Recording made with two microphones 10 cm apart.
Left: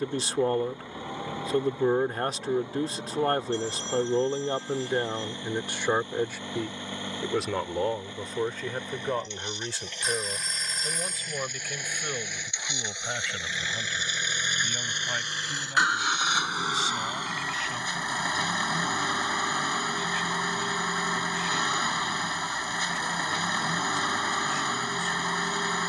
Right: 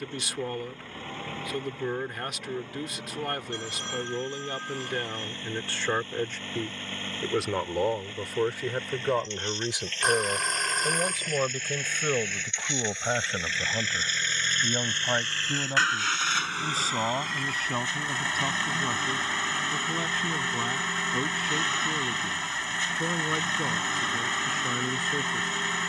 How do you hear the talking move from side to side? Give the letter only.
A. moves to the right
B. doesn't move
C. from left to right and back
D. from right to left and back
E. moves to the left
A.